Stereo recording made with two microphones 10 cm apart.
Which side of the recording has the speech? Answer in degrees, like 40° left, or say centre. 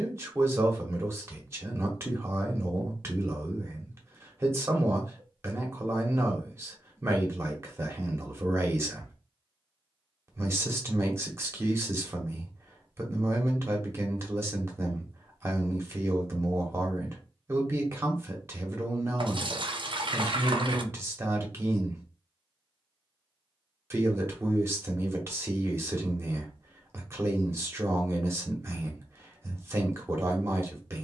30° right.